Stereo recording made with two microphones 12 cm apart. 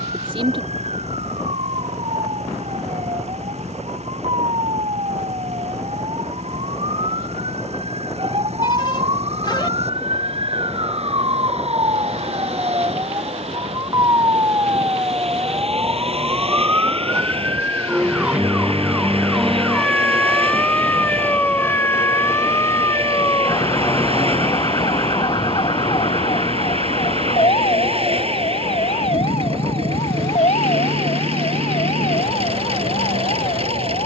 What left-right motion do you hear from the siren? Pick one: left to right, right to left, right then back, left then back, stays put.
right to left.